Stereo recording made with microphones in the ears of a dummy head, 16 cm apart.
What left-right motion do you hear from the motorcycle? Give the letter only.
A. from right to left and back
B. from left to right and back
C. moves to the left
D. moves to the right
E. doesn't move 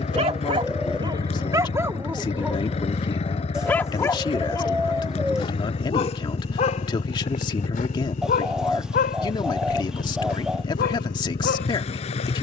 E.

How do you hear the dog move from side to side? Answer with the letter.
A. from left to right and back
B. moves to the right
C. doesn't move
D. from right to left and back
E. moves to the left
E.